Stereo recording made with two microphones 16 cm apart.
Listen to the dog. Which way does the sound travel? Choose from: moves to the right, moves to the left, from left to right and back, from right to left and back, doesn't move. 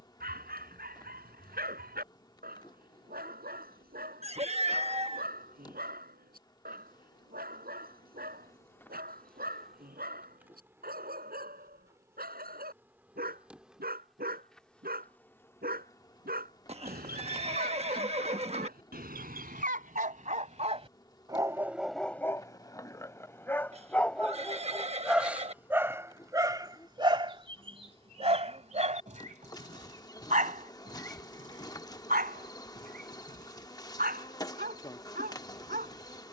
from right to left and back.